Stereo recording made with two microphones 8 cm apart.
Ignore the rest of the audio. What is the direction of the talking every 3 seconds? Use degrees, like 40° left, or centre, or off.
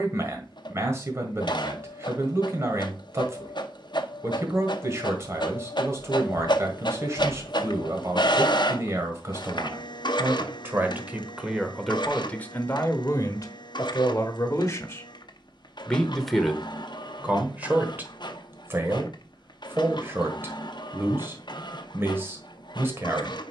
40° right, 40° right, 40° right, 20° right, 40° left, 10° right, 30° right, 30° right.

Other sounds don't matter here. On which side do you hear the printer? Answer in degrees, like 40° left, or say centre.
80° left.